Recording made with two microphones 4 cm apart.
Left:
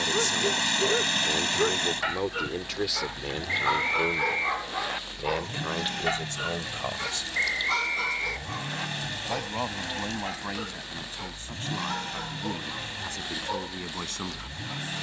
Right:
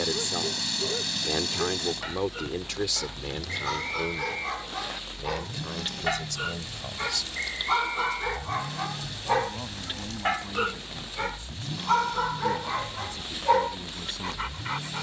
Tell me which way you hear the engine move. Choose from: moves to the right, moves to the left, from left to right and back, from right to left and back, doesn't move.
doesn't move.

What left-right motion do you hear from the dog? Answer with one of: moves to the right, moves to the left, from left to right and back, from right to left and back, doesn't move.
moves to the right.